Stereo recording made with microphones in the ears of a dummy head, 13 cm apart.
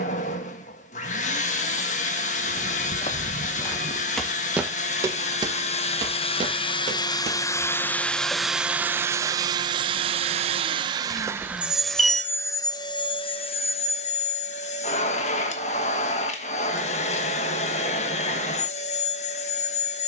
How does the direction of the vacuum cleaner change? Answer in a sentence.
You can hear the vacuum cleaner move from left to right and back again.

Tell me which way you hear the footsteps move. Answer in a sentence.
In this clip you hear the footsteps move to the right.